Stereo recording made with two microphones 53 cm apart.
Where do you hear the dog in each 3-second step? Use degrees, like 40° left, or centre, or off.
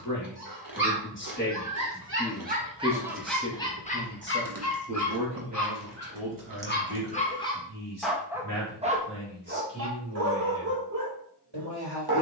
30° right, 20° left, 10° left, 30° right.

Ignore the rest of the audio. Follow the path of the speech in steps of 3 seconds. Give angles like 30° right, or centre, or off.
20° left, 20° right, 50° right, 60° right.